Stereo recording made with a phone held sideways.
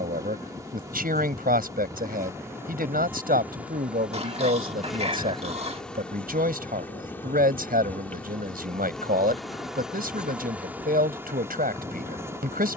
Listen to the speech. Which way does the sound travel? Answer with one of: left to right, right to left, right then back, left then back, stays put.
stays put.